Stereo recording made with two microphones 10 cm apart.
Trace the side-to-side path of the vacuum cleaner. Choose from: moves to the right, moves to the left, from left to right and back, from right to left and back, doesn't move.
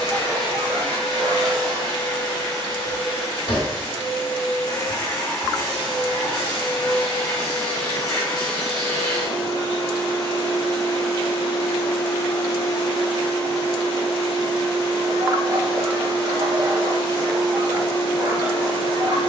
doesn't move.